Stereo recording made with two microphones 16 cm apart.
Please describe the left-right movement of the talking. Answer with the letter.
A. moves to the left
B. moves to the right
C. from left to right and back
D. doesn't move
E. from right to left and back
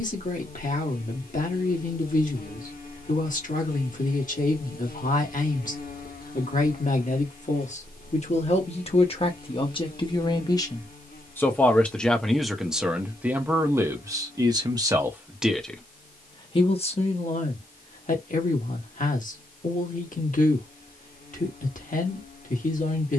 C.